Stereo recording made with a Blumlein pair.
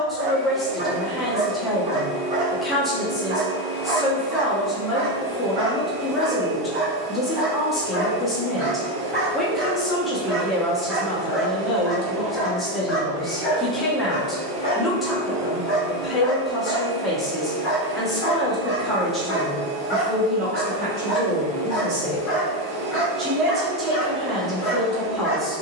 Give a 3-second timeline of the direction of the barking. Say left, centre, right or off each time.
right, right, right, centre, left, left, left, left, left.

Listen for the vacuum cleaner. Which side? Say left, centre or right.
right.